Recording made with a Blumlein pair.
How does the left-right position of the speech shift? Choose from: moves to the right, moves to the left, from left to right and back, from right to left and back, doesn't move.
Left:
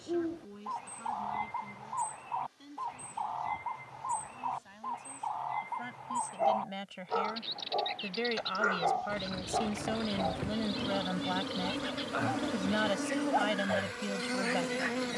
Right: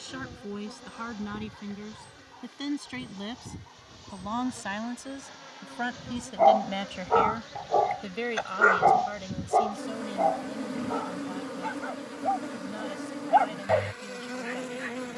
moves to the left.